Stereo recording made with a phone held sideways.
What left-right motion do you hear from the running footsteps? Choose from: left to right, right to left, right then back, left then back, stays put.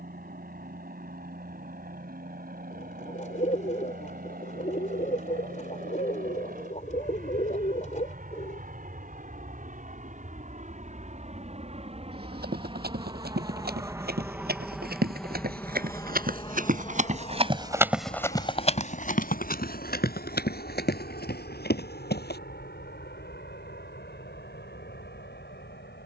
right to left.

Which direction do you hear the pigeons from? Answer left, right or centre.
left.